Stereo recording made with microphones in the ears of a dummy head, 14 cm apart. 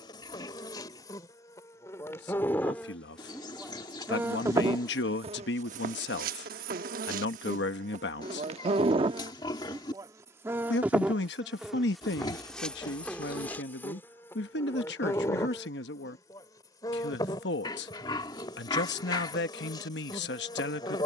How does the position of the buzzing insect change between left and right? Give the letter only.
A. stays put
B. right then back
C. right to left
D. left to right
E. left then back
B.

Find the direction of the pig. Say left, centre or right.
left.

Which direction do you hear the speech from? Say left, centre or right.
left.